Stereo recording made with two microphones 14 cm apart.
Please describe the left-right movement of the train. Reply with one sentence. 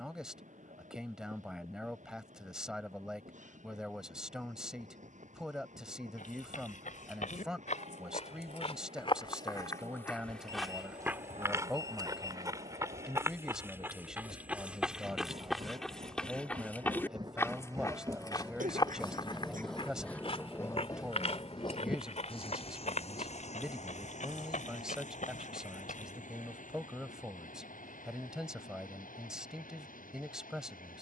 In this clip you hear the train go from the right side to the left.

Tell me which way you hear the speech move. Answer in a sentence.
You can hear the speech stay put.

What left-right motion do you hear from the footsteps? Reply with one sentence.
In this clip you hear the footsteps move from left to right and back again.